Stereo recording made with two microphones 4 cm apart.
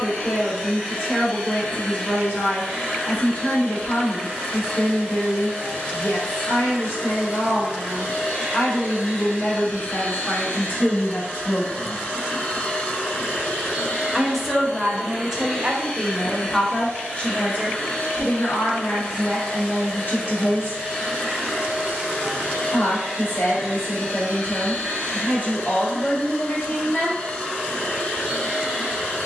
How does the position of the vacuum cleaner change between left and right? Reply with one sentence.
You can hear the vacuum cleaner stay in one place.